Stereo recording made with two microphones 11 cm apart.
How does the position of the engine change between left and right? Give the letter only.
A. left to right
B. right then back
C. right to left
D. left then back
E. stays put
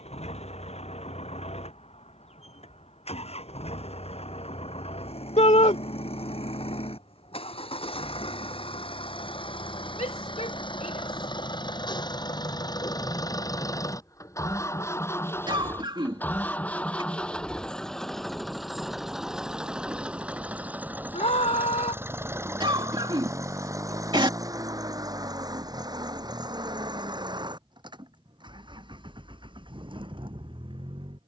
A.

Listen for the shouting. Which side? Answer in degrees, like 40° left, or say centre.
80° left.